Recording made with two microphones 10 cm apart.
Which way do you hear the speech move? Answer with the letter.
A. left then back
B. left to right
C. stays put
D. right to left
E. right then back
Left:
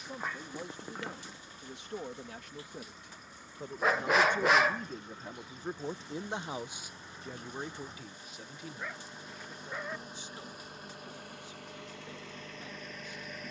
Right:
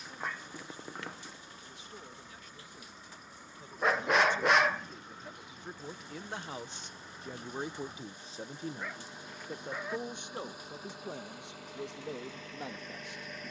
B.